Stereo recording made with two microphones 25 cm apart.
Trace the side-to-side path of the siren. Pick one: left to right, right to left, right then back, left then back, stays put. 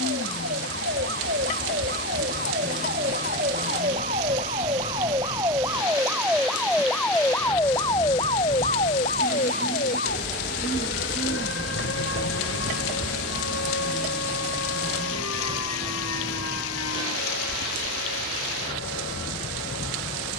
right to left.